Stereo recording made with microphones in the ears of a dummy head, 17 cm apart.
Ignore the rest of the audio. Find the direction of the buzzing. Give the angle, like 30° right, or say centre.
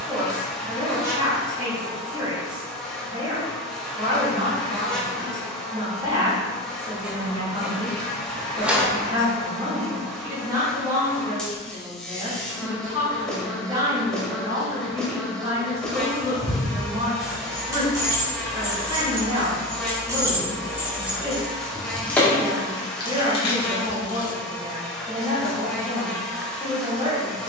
centre.